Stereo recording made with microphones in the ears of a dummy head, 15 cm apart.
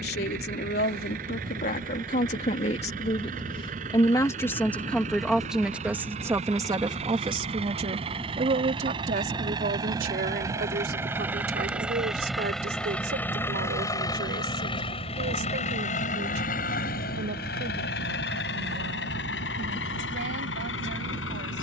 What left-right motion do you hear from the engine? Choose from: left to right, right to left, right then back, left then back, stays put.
right to left.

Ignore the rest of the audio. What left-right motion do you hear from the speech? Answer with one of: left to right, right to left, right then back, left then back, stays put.
left to right.